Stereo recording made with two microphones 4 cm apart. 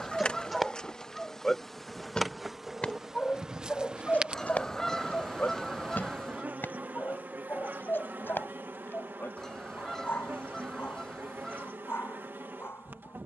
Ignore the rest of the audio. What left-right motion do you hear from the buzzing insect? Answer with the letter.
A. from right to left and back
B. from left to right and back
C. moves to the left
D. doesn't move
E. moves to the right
E.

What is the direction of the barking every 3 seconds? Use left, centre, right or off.
centre, left, left, left, left.